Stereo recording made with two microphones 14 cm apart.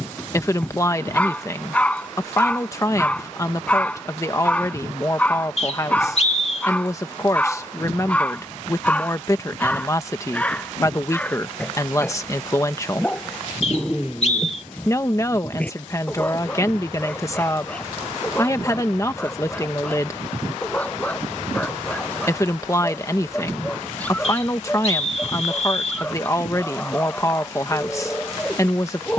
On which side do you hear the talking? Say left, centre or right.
left.